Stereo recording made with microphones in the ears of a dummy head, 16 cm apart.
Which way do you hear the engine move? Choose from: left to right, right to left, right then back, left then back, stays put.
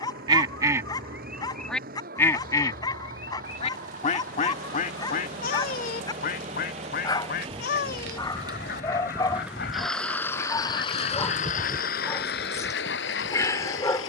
right to left.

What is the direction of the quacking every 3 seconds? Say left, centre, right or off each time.
centre, left, left, left, left.